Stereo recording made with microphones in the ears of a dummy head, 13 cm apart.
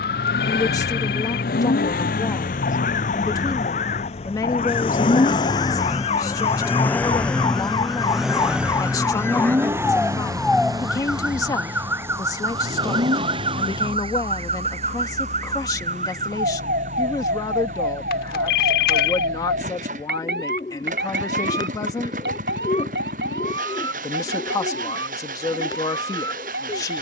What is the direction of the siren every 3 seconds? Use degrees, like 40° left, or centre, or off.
60° left, 50° left, 30° left, centre, 30° right, 50° right, 60° right, 70° right, 80° right.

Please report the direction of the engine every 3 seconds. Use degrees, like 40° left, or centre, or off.
60° left, 40° left, centre, 20° right, 40° right, 40° right, 50° right, 50° right, 60° right.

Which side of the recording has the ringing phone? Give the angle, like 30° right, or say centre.
60° left.